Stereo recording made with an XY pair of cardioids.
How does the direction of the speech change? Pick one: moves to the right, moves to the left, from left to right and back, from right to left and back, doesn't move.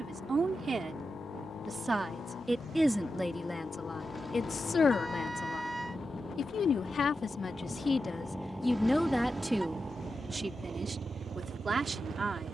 from right to left and back.